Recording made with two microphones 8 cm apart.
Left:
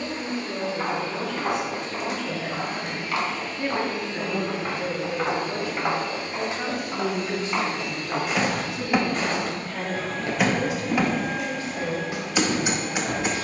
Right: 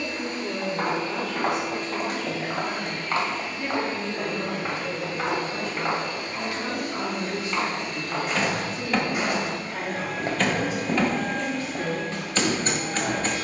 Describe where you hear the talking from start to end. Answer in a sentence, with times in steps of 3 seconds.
In this clip you hear the talking on the right from 0 s, on the left from 3 s and on the right from 9 s.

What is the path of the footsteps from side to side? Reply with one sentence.
In this clip you hear the footsteps move from right to left and back again.